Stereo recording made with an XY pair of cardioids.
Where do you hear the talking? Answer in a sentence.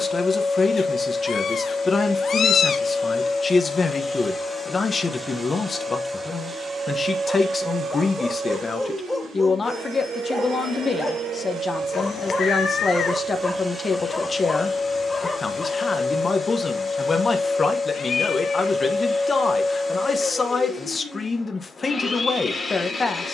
In this clip you hear the talking on the left.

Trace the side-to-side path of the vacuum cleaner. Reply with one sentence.
You can hear the vacuum cleaner go right and come back.